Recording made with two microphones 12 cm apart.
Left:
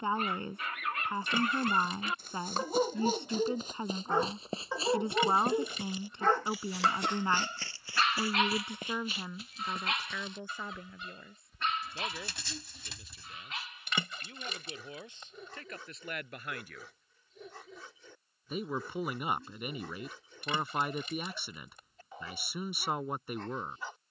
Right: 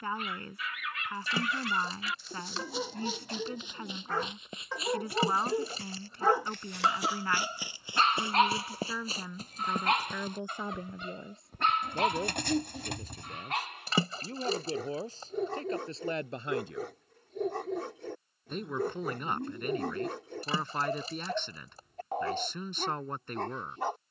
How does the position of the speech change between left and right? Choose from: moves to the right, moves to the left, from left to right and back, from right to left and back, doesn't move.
from left to right and back.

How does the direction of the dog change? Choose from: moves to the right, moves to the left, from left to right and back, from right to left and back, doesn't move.
moves to the right.